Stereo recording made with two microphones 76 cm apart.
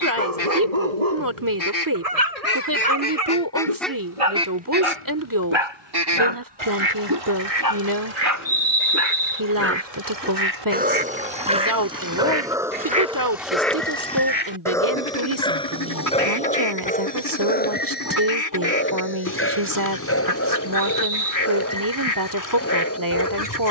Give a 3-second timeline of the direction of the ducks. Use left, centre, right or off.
left, centre, right, right, centre, left, left, left.